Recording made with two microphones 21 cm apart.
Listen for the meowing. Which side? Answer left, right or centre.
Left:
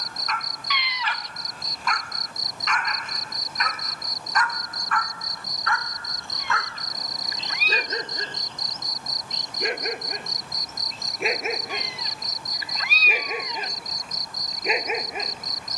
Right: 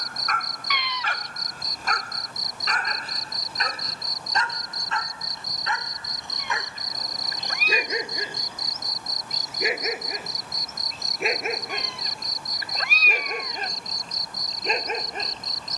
right.